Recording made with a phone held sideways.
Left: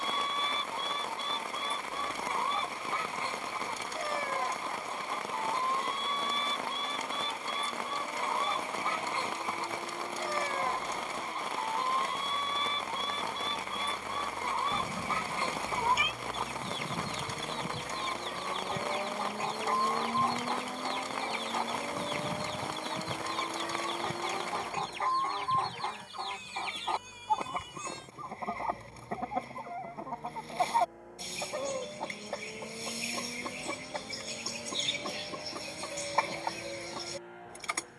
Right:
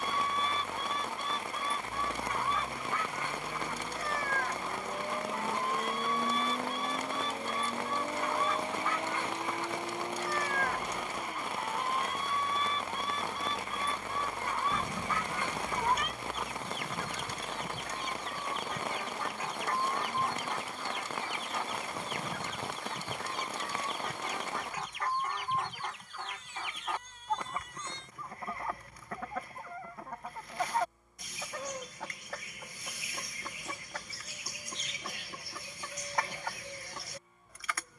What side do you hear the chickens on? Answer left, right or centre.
left.